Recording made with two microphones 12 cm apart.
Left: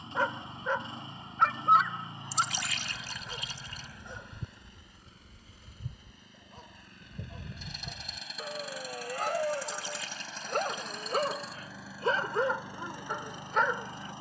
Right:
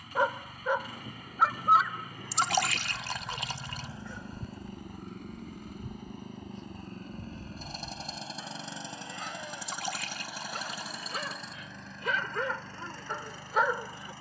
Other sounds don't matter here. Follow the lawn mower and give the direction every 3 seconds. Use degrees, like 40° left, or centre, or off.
20° left, 40° right, 40° right, 10° right, 20° left.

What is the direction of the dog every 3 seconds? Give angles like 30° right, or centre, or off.
10° right, 30° left, 50° left, 50° left, 10° left.